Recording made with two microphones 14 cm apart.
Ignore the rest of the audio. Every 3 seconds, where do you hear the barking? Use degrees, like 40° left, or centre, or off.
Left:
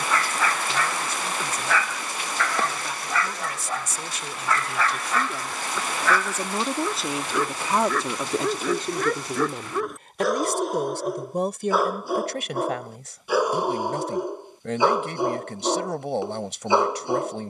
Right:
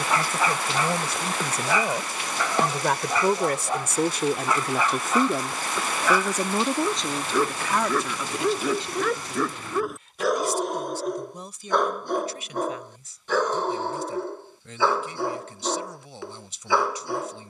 20° right, 20° right, 10° right, centre, 10° left, 20° left.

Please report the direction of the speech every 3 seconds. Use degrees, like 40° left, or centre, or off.
70° right, 50° right, 20° left, 60° left, 70° left, 70° left.